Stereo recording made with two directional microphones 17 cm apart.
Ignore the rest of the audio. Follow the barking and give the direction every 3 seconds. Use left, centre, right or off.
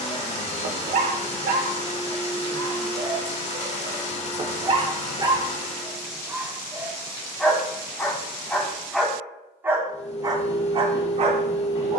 right, right, centre, right.